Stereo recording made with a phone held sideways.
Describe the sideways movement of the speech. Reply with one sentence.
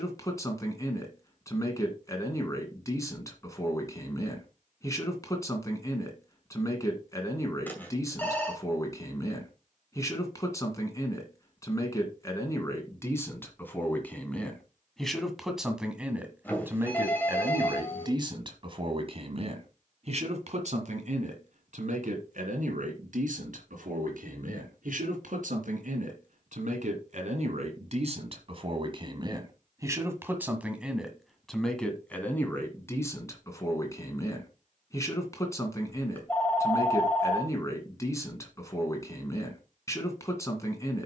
In this clip you hear the speech move from left to right and back again.